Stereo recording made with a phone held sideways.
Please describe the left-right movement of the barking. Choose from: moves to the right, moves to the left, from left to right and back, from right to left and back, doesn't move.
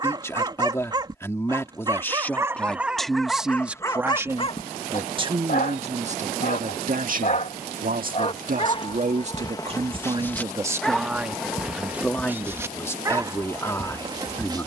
from right to left and back.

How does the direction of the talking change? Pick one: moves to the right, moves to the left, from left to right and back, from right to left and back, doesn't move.
from left to right and back.